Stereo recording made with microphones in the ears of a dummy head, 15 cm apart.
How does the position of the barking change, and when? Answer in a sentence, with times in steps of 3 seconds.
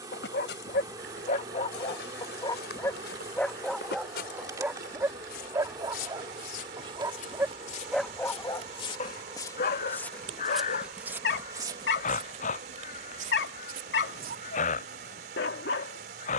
In this clip you hear the barking on the left from 0 s, in the centre from 3 s and on the left from 9 s.